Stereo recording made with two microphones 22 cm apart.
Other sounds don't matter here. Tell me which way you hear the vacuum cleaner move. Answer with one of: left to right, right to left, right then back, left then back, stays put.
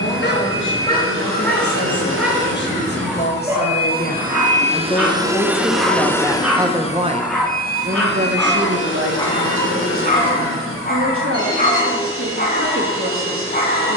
right to left.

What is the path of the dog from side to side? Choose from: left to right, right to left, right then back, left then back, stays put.
right then back.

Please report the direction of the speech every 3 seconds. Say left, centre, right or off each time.
left, left, right, right, right.